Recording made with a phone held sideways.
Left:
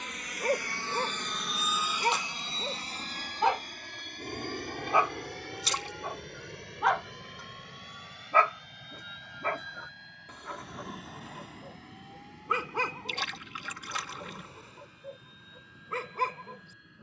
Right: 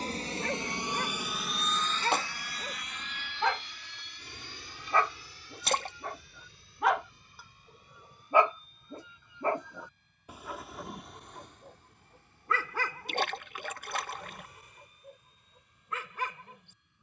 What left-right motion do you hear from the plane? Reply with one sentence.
In this clip you hear the plane travel towards the left.